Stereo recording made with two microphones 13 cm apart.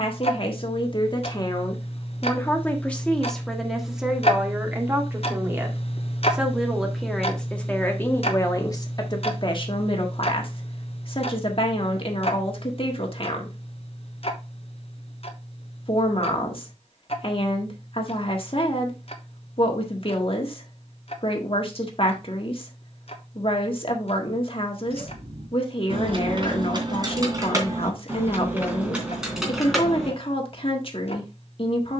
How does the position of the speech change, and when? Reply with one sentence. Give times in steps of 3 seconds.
You can hear the speech on the left from 0 s, in the centre from 3 s and on the left from 9 s.